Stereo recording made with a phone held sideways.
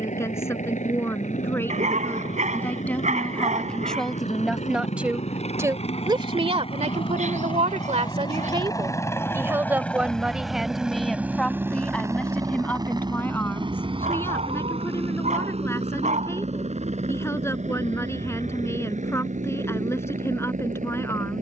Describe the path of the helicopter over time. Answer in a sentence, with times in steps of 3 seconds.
You can hear the helicopter on the left from 0 s, in the centre from 9 s and on the right from 12 s.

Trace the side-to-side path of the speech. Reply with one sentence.
You can hear the speech move from left to right and back again.